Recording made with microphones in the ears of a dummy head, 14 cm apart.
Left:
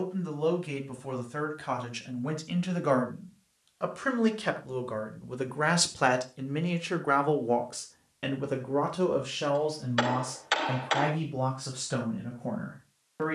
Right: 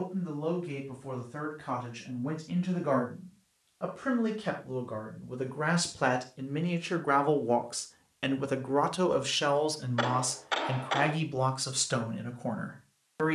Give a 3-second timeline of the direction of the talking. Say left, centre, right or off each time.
left, left, centre, right, right.